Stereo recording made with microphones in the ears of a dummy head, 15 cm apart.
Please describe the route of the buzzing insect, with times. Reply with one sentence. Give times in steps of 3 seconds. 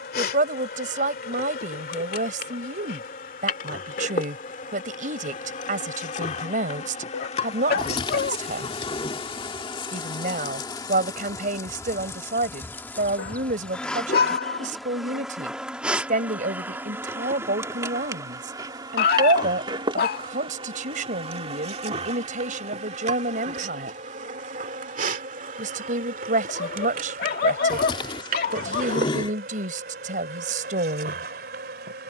You can hear the buzzing insect on the left from 0 s, in the centre from 12 s and on the right from 18 s.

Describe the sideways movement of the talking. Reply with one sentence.
You can hear the talking stay in one place.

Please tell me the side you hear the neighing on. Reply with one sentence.
In this clip you hear the neighing on the left.